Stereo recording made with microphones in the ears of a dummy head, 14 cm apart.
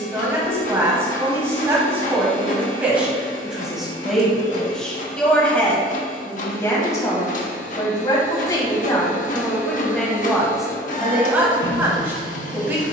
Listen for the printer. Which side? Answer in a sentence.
In this clip you hear the printer on the left.